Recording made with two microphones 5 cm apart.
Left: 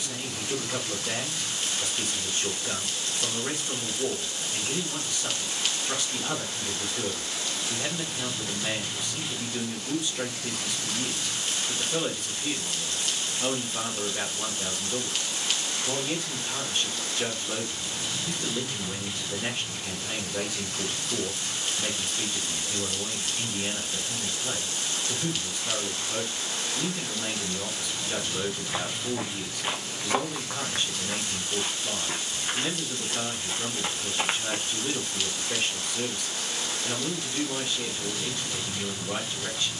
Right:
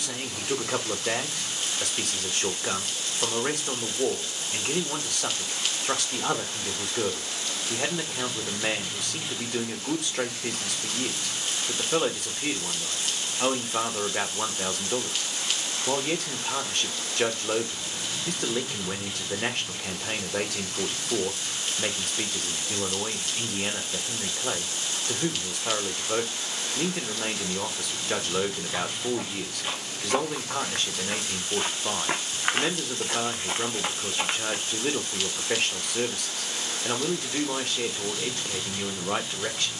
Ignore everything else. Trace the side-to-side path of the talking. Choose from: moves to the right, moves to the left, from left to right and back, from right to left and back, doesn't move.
doesn't move.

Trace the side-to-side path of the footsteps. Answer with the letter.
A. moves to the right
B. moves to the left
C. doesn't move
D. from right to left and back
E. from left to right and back
E.